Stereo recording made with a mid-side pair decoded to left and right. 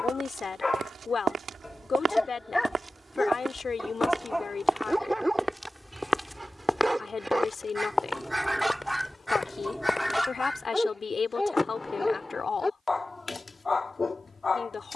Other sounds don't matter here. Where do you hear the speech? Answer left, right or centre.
left.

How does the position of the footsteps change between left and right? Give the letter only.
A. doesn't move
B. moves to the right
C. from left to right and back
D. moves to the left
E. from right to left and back
D.